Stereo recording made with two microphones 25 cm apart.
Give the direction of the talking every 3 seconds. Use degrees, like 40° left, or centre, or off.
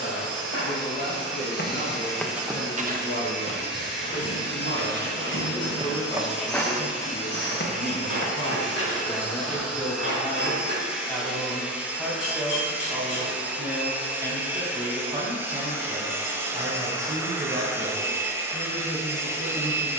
50° left, 40° left, 30° left, 10° left, 10° right, 30° right, 40° right.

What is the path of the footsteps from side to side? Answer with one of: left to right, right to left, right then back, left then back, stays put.
right then back.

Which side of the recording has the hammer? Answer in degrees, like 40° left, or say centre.
70° left.